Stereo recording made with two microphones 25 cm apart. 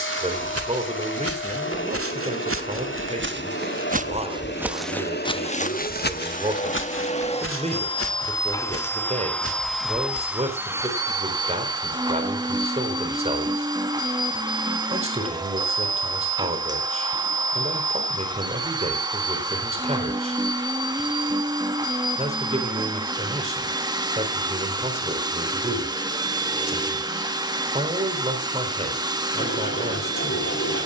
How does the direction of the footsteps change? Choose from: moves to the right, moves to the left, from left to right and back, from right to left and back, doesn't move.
moves to the left.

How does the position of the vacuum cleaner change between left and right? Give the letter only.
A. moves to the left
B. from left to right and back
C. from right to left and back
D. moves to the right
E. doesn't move
D.